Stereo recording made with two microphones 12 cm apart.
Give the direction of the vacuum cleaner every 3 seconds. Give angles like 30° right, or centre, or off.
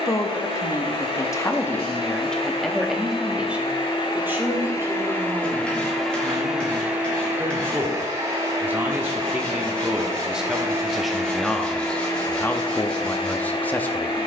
50° left, 30° left, 20° right, 20° right, 40° left.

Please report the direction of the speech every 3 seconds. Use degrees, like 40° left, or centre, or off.
20° left, 20° right, 20° right, centre, 10° left.